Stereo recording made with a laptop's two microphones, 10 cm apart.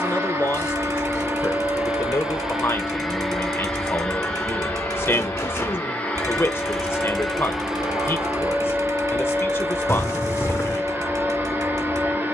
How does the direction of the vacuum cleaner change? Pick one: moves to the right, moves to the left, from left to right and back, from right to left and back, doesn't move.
from right to left and back.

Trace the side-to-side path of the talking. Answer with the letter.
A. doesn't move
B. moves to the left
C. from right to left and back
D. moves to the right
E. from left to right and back
A.